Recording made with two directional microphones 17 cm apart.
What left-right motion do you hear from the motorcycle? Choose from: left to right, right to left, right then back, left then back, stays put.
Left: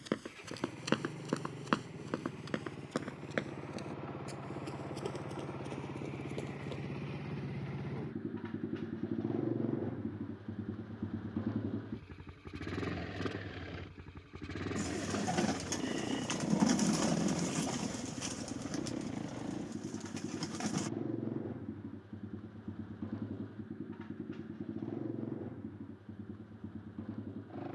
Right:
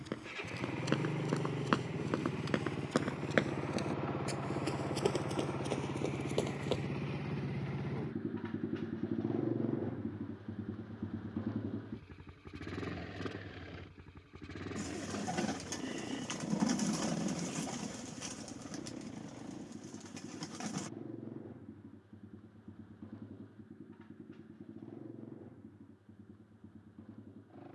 right to left.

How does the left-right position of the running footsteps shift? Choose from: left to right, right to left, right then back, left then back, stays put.
left to right.